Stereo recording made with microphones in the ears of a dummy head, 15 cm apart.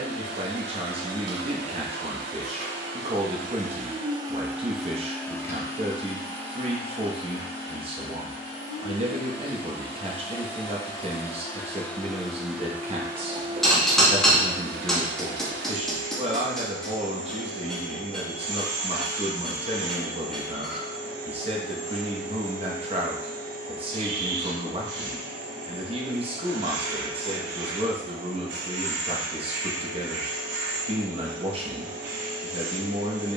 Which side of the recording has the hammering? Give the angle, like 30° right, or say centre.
centre.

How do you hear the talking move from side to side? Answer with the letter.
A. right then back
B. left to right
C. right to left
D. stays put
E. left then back
D.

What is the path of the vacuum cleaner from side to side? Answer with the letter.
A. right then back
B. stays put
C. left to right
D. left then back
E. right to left
D.